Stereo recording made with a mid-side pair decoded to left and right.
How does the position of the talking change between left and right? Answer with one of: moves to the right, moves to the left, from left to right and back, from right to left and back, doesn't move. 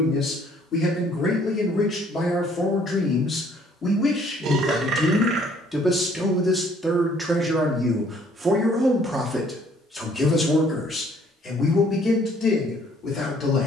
from left to right and back.